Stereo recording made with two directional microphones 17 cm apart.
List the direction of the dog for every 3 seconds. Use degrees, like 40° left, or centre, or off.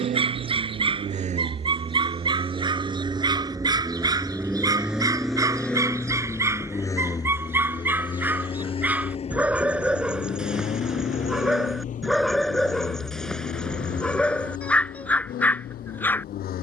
30° right, 20° right, 10° right, centre, centre, 10° left.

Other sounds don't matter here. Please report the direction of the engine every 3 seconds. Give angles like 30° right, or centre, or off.
40° right, 10° right, 20° left, 40° left, 50° left, 60° left.